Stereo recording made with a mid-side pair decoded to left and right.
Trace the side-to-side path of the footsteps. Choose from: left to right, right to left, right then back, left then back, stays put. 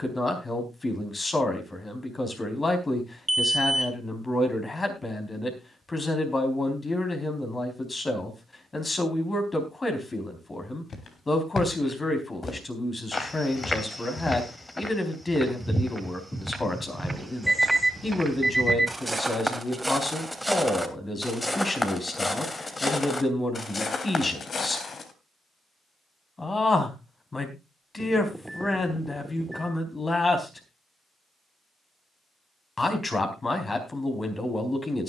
right then back.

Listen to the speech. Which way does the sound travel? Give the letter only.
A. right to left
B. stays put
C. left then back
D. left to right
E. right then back
B.